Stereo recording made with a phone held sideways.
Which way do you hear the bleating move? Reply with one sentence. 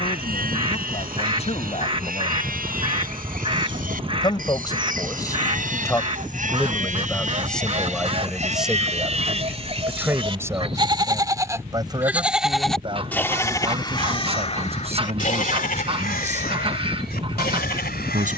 In this clip you hear the bleating go from the right side to the left.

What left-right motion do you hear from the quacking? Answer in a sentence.
You can hear the quacking stay in one place.